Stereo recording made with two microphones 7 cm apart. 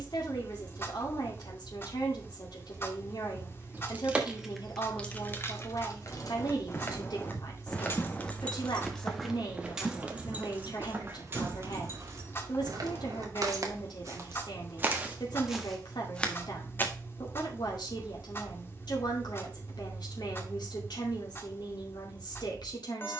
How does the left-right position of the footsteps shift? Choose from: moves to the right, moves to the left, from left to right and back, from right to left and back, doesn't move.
from left to right and back.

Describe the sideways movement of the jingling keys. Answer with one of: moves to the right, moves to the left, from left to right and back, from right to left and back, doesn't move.
from right to left and back.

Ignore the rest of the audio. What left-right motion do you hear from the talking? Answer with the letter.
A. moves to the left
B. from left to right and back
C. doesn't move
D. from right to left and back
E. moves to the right
C.